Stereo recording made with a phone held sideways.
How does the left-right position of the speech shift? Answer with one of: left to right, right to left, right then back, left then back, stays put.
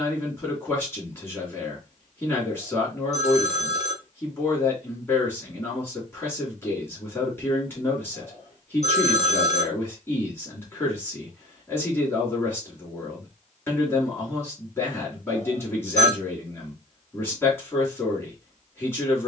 stays put.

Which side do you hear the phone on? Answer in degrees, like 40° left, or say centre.
60° left.